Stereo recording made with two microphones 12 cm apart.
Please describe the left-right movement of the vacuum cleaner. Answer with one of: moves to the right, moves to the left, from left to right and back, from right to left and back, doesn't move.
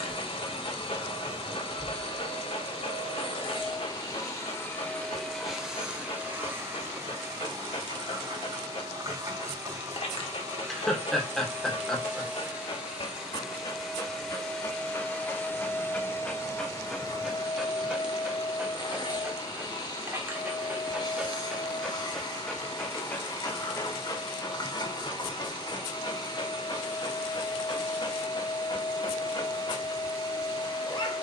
from left to right and back.